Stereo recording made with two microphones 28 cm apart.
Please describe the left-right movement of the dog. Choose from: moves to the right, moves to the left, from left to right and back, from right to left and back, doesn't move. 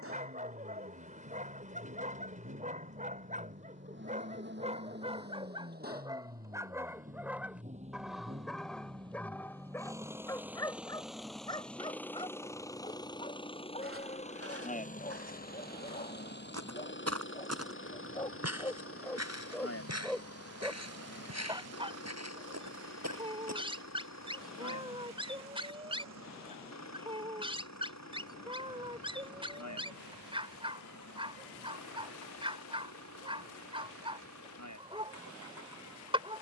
from right to left and back.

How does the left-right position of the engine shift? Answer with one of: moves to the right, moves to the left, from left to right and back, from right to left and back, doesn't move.
moves to the left.